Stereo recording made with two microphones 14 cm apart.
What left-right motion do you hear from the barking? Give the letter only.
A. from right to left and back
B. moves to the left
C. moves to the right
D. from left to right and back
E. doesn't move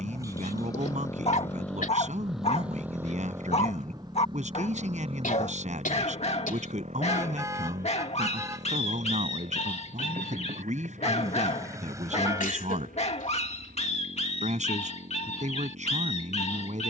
E.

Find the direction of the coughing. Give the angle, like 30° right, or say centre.
70° left.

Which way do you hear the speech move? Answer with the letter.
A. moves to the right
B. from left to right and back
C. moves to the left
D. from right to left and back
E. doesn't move
E.